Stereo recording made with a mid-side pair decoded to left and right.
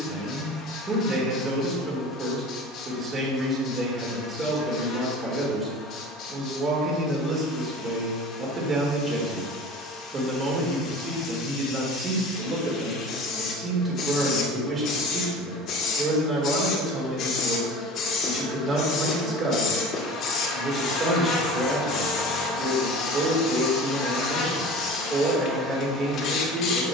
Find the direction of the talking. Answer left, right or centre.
right.